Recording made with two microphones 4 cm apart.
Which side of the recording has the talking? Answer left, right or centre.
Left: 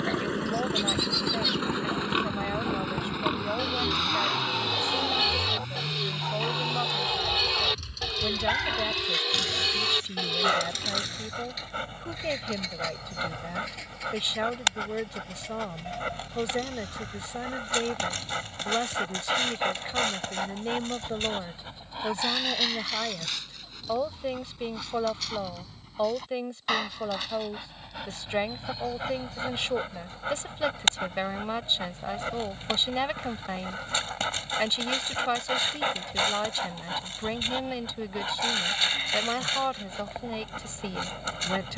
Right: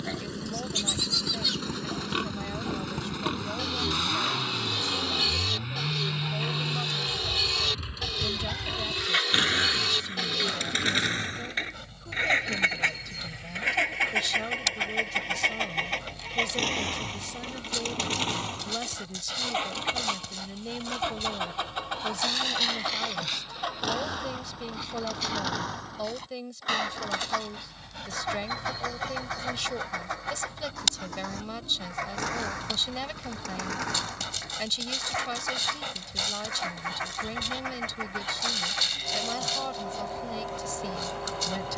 left.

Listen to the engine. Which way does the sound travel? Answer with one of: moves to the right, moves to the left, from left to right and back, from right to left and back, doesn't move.
moves to the right.